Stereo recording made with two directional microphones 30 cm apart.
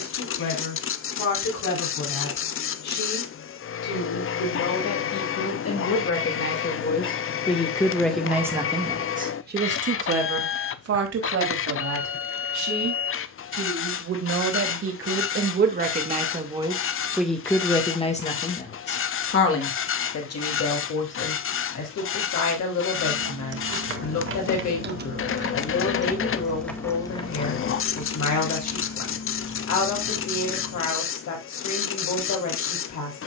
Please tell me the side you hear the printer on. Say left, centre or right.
left.